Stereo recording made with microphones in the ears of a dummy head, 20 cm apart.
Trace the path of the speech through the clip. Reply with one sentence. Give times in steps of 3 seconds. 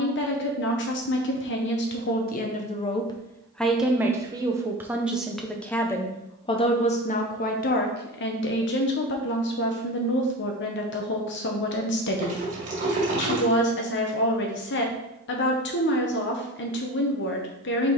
In this clip you hear the speech on the left from 0 s, in the centre from 3 s and on the left from 6 s.